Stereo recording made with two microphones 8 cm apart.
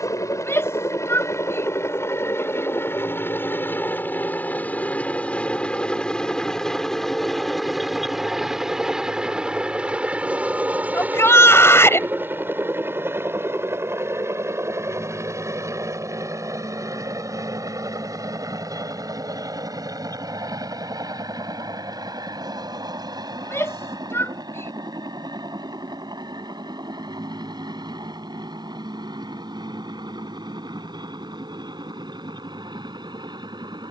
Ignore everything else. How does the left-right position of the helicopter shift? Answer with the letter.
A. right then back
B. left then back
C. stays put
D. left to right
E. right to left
D.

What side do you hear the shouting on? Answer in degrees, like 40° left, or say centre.
30° left.